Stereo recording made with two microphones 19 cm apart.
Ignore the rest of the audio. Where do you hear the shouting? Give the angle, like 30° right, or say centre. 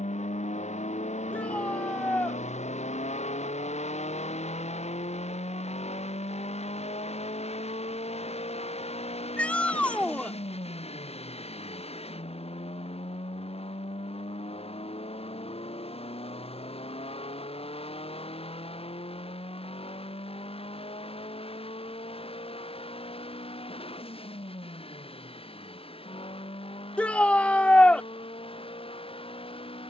10° left.